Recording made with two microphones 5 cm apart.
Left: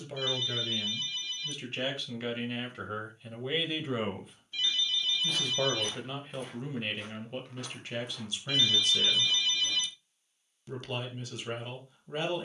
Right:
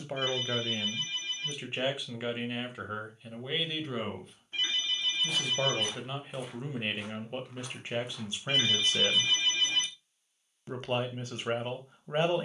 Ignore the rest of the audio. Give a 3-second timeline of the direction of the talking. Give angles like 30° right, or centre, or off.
20° right, centre, 20° right, 40° right.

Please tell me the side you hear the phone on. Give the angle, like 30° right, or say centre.
40° right.